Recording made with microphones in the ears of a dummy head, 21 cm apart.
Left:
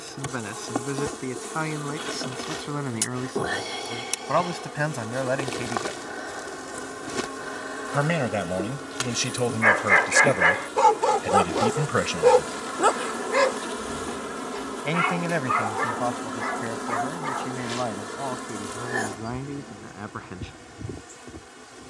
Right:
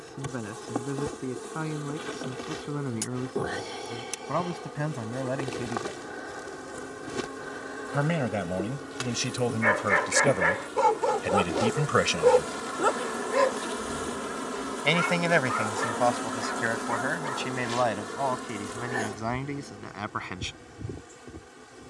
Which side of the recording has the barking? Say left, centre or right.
left.